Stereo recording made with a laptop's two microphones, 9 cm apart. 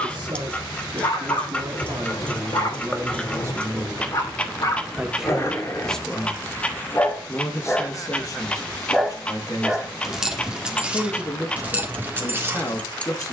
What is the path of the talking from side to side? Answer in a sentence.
In this clip you hear the talking move from right to left.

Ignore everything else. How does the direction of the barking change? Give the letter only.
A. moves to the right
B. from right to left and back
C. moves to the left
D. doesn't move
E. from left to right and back
A.